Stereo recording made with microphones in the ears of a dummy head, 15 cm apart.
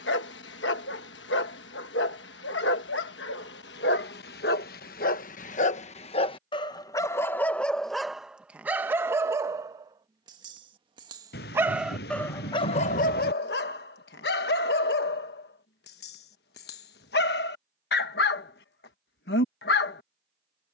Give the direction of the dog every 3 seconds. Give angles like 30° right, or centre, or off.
80° left, 60° left, 10° left, 20° right, 50° left, 70° left, 70° left.